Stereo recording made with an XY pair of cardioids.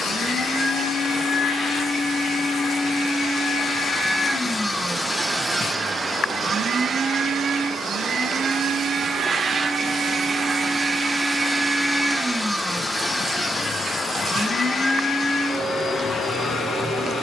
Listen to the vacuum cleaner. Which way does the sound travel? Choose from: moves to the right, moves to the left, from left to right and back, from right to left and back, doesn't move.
from left to right and back.